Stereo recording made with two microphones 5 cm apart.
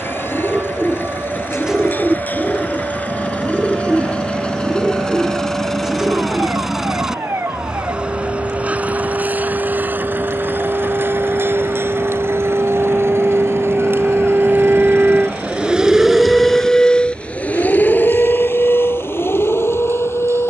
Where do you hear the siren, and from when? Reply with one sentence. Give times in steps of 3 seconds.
In this clip you hear the siren on the right from 0 s, in the centre from 15 s and on the left from 18 s.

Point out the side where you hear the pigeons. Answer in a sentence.
You can hear the pigeons in the centre.